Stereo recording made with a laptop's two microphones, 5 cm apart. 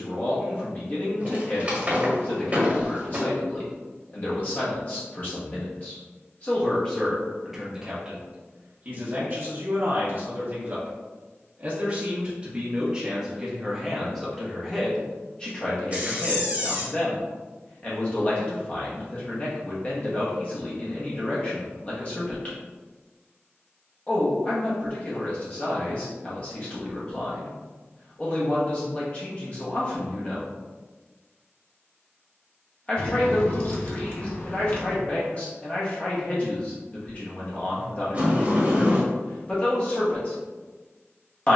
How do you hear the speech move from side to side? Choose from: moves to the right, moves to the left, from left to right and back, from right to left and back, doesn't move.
from left to right and back.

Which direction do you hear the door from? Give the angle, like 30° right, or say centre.
30° right.